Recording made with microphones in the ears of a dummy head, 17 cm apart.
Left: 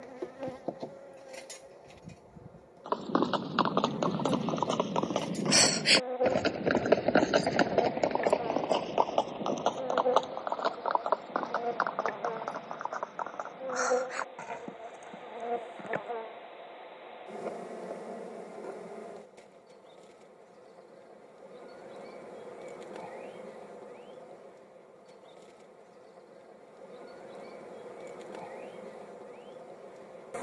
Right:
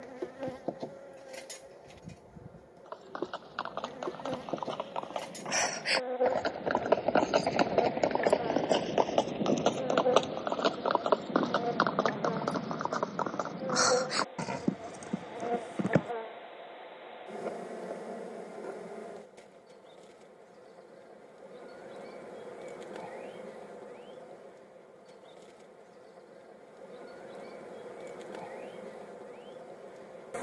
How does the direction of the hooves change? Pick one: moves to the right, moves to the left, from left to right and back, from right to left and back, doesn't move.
moves to the right.